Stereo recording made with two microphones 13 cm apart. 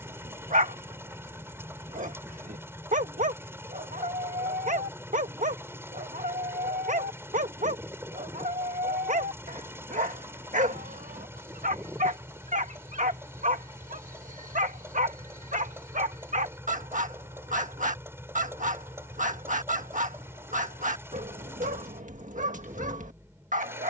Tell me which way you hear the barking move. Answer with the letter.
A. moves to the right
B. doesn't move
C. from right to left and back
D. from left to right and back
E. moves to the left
B.